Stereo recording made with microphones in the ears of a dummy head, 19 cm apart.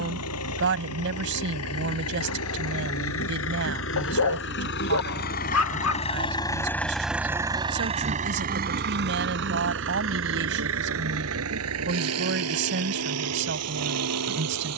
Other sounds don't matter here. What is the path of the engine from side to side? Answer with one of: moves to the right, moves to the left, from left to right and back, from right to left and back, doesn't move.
moves to the right.